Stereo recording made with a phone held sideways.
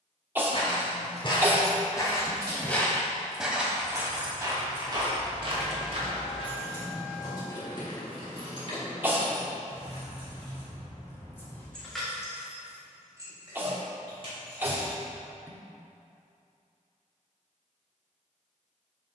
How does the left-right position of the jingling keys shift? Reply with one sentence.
In this clip you hear the jingling keys move from right to left and back again.